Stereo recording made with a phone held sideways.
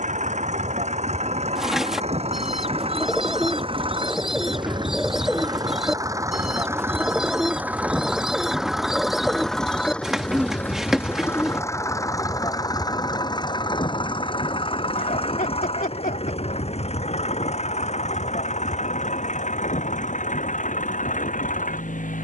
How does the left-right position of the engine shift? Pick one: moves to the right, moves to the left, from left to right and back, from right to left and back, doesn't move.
moves to the left.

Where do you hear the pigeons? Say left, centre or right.
centre.